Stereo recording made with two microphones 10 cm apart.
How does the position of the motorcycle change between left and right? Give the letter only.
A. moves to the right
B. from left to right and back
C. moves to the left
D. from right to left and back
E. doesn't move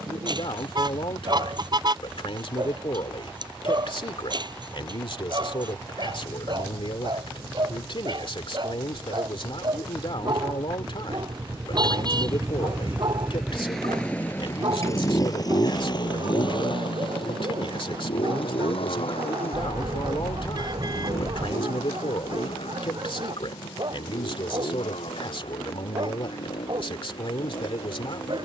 C.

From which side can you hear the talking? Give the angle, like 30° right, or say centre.
70° left.